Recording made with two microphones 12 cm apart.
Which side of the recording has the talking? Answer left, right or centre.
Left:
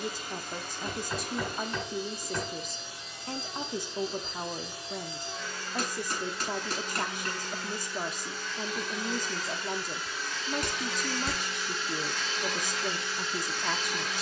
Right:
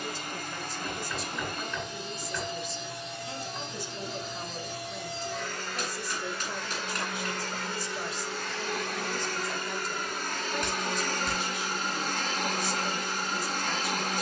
left.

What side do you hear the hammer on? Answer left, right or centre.
left.